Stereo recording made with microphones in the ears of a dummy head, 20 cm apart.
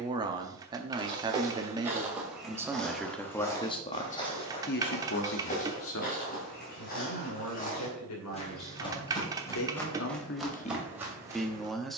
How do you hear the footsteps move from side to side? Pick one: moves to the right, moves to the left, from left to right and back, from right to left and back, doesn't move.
from right to left and back.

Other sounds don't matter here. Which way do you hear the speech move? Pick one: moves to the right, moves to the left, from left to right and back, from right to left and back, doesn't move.
from right to left and back.